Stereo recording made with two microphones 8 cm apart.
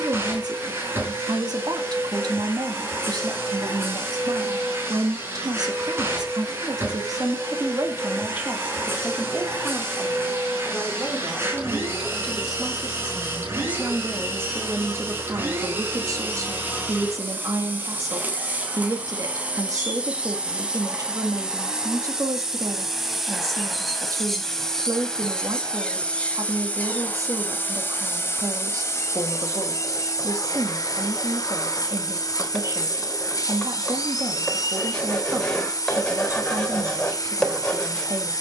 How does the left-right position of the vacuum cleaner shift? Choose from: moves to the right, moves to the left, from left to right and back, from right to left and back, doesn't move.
moves to the left.